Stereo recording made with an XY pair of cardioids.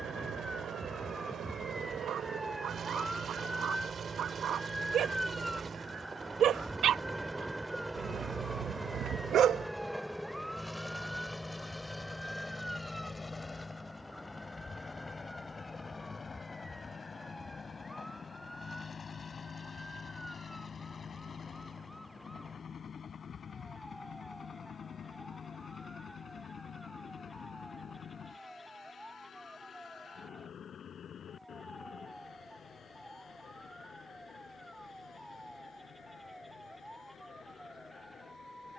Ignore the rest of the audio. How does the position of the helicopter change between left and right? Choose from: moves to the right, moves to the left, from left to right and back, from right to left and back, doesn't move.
moves to the left.